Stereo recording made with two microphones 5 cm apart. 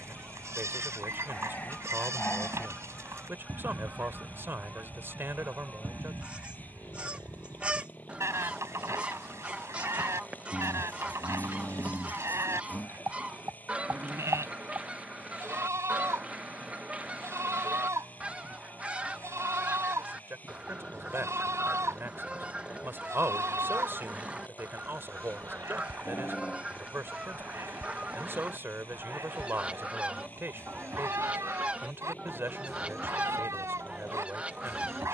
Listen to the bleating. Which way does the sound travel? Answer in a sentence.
You can hear the bleating stay put.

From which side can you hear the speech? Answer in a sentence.
You can hear the speech on the right.